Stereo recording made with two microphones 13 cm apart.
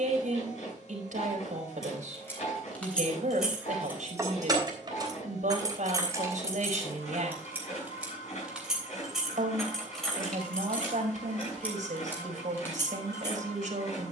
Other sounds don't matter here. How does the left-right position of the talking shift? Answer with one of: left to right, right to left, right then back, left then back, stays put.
stays put.